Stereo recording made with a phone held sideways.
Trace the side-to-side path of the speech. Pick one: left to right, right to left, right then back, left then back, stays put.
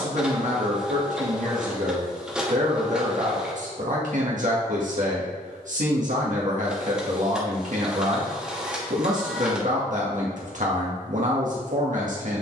stays put.